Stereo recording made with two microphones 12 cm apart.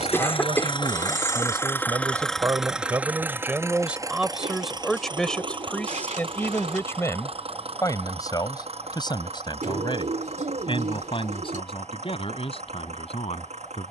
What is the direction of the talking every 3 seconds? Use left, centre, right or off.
right, centre, left, left, left.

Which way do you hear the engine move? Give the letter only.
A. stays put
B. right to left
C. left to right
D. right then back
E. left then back
C.